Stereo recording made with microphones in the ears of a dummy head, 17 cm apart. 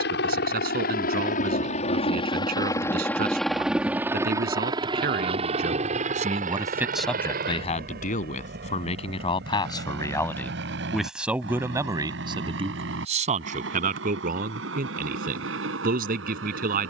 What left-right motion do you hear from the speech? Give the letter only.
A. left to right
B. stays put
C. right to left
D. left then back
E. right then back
D.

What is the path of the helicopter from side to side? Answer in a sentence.
You can hear the helicopter travel towards the right.